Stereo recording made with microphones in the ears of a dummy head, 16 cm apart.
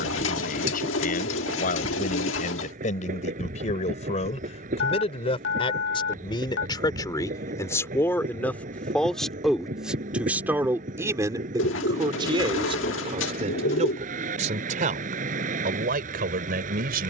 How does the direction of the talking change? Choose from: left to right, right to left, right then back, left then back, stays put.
left to right.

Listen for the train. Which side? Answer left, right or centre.
right.